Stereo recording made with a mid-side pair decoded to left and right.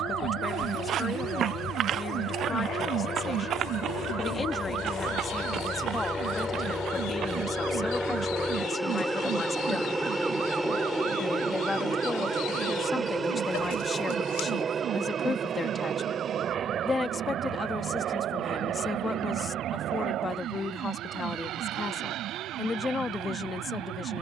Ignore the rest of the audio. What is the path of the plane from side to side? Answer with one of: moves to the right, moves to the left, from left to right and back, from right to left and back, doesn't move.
moves to the right.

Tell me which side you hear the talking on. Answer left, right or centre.
left.